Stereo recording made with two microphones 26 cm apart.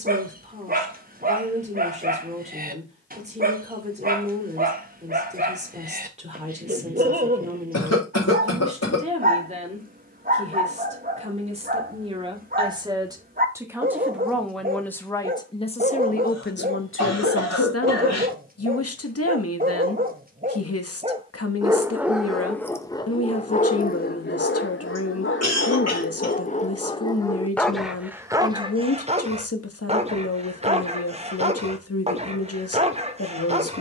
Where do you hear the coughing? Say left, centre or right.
left.